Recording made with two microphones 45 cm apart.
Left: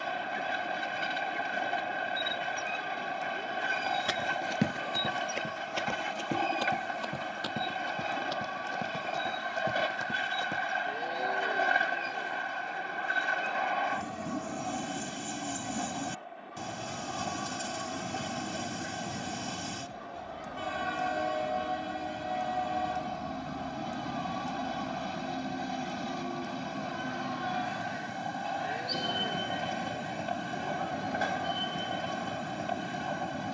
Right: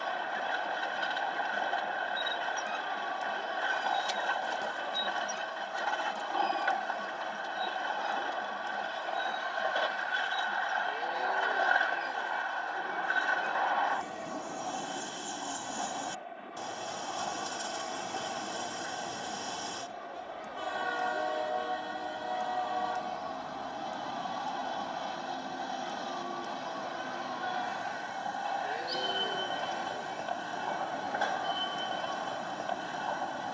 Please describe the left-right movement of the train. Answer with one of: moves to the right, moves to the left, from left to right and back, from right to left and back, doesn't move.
doesn't move.